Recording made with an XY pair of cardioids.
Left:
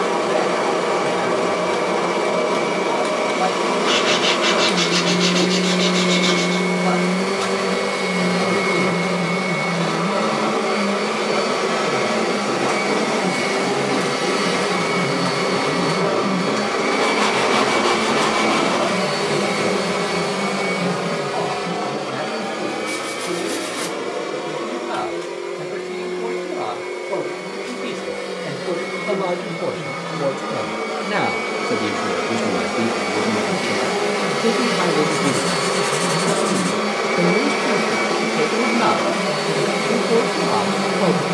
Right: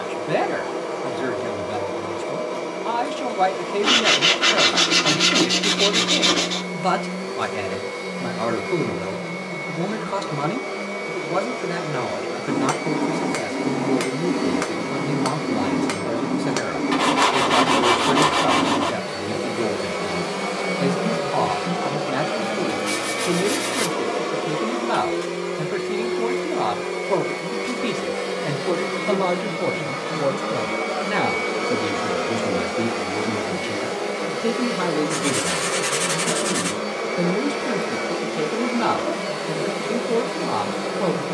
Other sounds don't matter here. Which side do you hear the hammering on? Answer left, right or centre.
right.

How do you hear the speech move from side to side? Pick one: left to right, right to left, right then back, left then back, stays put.
right to left.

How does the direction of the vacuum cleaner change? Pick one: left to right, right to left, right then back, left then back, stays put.
right then back.